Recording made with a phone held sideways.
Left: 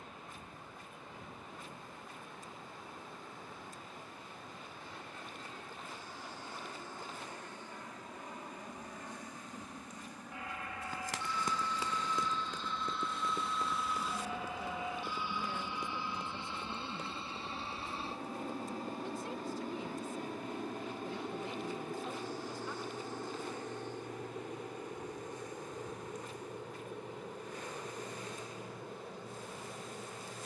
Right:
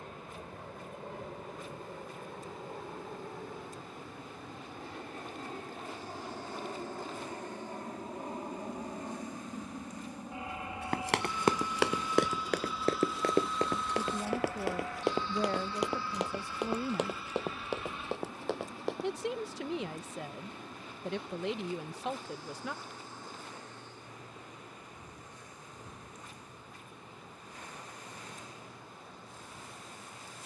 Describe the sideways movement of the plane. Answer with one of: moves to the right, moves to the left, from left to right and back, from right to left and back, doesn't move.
moves to the left.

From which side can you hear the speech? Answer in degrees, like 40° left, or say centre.
80° right.